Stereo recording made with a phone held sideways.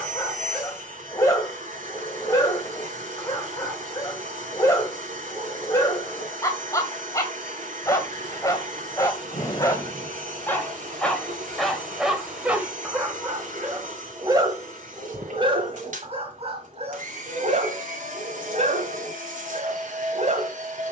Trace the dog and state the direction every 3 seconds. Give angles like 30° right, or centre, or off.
20° left, 20° left, 20° left, 10° left, 20° right, 40° right, 50° right.